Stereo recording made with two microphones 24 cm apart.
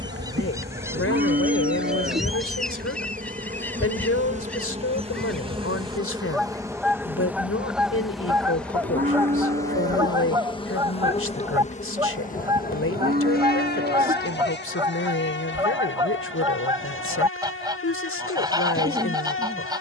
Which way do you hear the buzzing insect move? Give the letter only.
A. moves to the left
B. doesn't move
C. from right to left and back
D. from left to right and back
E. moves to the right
A.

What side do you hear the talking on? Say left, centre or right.
left.